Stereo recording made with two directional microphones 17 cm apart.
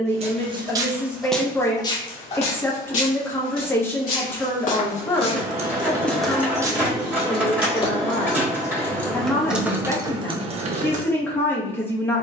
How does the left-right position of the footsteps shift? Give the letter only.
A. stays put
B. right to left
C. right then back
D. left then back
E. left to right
D.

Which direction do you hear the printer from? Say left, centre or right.
centre.